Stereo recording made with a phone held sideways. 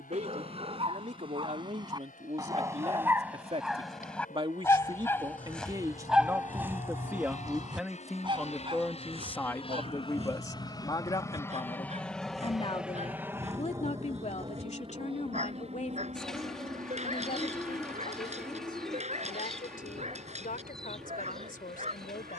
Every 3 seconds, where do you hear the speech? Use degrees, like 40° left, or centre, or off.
50° right, 30° right, 10° right, 20° left, 40° left, 50° left, 60° left, 70° left.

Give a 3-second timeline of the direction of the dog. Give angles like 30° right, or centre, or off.
30° right, centre, 20° right, 50° right, 50° right, 50° right, 50° right, 50° right.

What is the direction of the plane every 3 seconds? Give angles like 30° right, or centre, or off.
80° left, 70° left, 60° left, 30° left, 20° right, 50° right, 60° right, 70° right.